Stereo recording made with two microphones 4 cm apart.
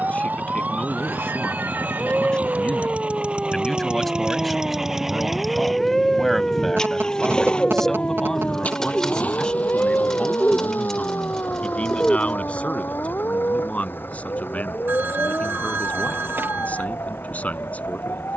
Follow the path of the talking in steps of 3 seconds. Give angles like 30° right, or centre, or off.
30° left, centre, 10° left, 30° left, 40° left, 40° left.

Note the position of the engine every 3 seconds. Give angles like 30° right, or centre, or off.
50° right, 20° right, 20° left, 50° left, 60° left, 70° left.